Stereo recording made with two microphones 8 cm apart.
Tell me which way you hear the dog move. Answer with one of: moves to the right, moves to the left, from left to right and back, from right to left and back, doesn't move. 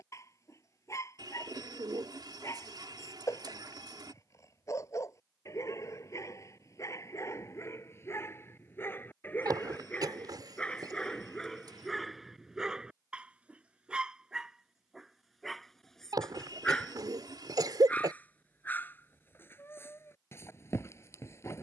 from left to right and back.